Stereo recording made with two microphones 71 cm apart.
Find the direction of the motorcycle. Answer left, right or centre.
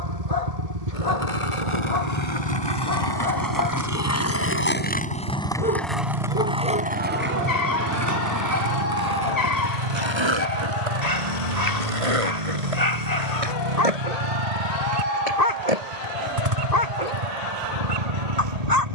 right.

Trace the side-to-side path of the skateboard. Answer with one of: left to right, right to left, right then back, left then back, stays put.
left to right.